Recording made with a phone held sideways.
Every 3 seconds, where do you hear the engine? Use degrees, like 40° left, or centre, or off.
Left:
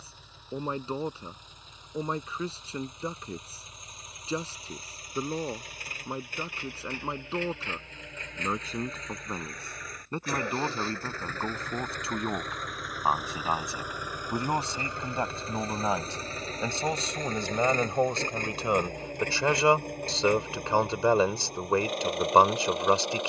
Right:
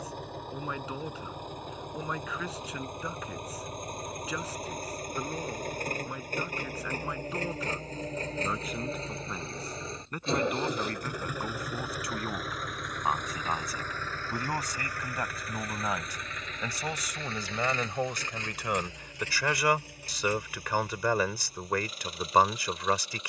60° right, 50° right, 40° right, 20° right, 10° left, 30° left, 50° left, 60° left.